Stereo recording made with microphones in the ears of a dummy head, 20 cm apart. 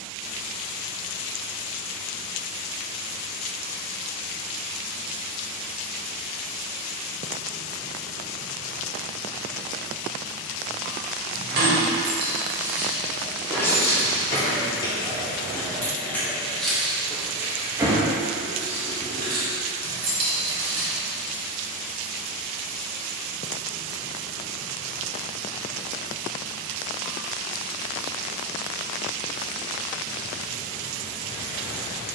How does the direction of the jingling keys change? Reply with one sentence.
In this clip you hear the jingling keys go left and come back.